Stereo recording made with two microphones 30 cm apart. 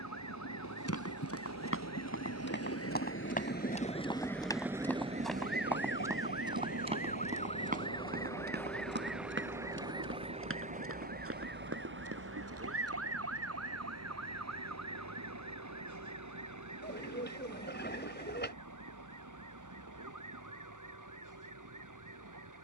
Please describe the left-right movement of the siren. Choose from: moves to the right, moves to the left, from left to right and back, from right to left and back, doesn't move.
moves to the right.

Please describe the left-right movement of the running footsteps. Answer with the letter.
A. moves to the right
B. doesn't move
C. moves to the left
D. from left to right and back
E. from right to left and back
A.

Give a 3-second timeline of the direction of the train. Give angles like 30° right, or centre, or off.
70° left, centre, 50° right, 70° right, 70° right, 80° right, 80° right, 80° right.